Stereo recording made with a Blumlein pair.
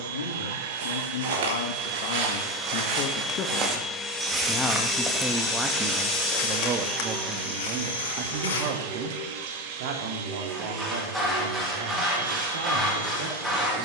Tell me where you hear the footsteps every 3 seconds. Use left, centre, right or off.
right, centre, left, off, off.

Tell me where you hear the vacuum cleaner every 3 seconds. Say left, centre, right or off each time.
right, centre, right, right, right.